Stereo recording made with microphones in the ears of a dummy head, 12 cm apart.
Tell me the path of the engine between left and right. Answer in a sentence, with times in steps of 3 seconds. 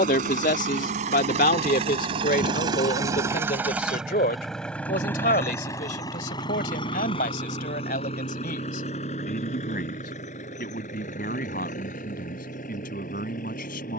In this clip you hear the engine on the right from 0 s, in the centre from 3 s and on the left from 6 s.